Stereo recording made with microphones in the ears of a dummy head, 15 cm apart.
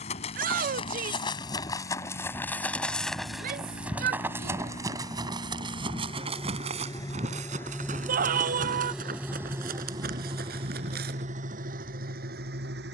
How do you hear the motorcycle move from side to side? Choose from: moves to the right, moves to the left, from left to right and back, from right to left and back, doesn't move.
moves to the right.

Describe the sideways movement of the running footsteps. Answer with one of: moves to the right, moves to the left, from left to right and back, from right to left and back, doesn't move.
moves to the right.